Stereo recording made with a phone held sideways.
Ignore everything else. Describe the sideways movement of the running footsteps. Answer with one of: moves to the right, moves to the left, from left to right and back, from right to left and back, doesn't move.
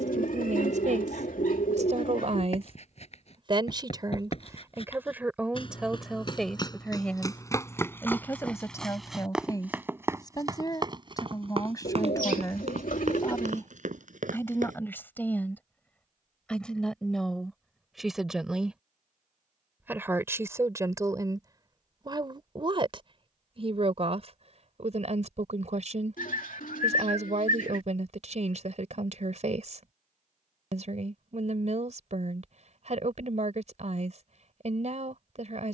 moves to the right.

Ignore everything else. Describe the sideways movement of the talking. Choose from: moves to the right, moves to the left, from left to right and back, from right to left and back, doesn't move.
from right to left and back.